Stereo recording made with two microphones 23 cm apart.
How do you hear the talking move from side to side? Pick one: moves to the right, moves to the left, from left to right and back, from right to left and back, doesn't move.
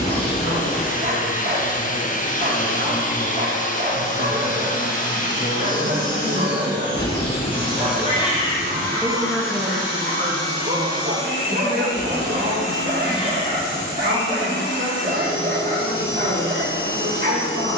moves to the right.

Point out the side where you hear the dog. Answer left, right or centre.
right.